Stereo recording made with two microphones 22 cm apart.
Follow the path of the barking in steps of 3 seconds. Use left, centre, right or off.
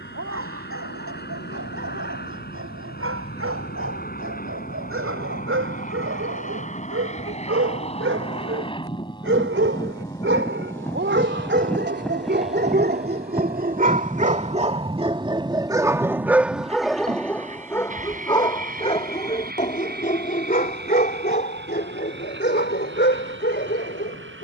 right, right, right, right, right, centre, left, left.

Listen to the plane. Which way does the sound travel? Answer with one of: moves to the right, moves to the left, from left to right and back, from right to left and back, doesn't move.
moves to the right.